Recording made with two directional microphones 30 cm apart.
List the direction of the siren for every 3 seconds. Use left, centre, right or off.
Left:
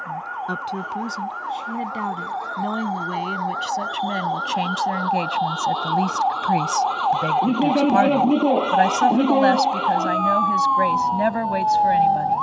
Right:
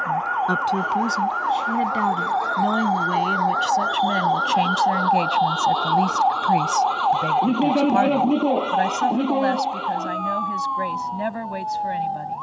right, right, centre, left.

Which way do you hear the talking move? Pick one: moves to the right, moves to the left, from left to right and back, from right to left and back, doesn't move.
moves to the left.